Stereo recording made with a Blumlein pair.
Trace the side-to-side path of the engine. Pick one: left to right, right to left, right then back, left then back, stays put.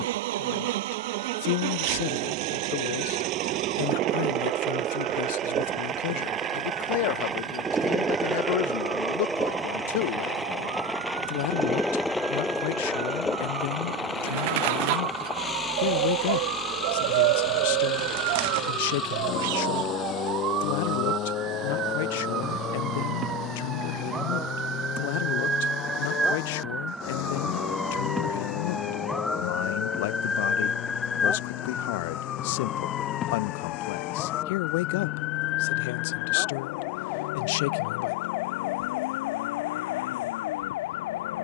right to left.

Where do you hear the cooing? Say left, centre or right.
right.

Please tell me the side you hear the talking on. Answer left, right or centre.
left.